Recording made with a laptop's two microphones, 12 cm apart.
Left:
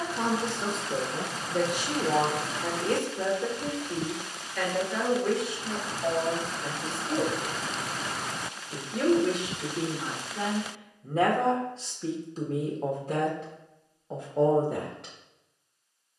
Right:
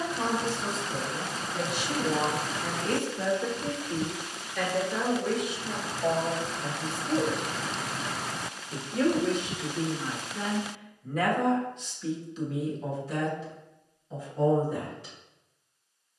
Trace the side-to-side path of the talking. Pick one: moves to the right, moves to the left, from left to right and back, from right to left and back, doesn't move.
from left to right and back.